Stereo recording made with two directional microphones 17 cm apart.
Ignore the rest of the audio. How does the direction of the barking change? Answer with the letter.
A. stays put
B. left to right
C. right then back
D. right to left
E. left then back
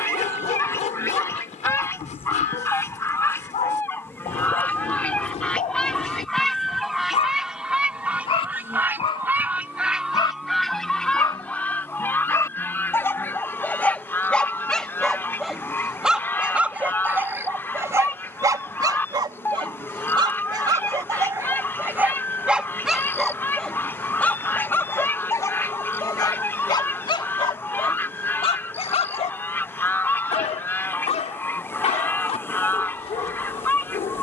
C.